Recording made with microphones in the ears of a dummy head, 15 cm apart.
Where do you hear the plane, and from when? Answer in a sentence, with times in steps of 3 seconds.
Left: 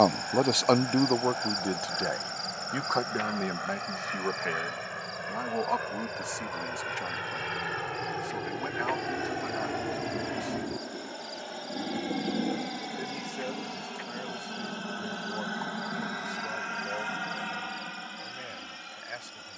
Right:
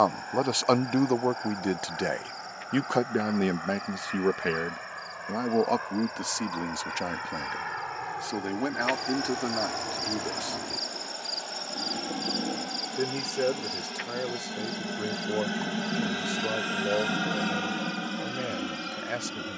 In this clip you hear the plane on the left from 0 s, in the centre from 12 s and on the right from 15 s.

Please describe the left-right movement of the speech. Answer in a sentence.
You can hear the speech move to the right.